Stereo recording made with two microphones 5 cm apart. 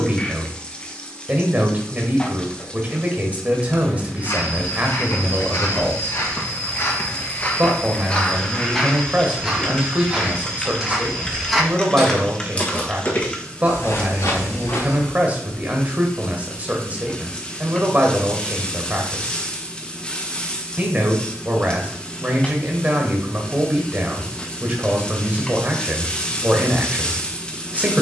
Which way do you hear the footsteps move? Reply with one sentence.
In this clip you hear the footsteps go right and come back.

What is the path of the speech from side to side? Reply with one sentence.
In this clip you hear the speech stay put.